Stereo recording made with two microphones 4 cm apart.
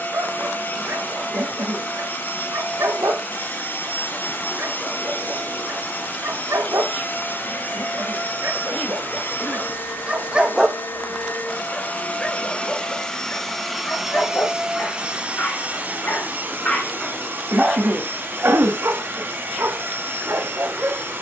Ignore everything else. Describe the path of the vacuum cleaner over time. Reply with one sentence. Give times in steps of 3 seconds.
You can hear the vacuum cleaner on the left from 0 s, in the centre from 12 s and on the right from 15 s.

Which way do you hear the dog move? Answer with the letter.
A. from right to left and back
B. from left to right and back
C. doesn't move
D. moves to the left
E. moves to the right
A.